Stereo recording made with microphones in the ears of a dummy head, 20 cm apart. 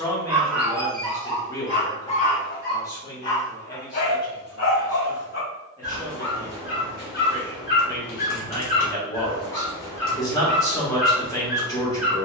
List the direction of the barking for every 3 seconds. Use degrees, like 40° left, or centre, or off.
20° left, 70° left, 50° left, 10° left.